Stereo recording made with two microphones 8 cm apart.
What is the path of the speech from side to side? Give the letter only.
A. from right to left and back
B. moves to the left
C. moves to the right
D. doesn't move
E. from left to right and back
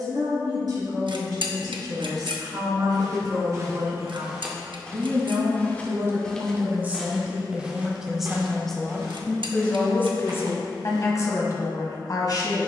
B.